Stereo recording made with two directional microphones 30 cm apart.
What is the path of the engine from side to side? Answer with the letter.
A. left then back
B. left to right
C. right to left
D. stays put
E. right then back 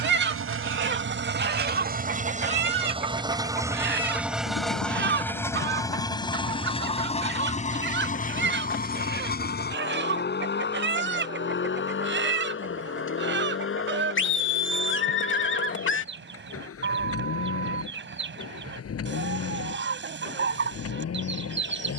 C.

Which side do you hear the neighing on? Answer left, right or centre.
left.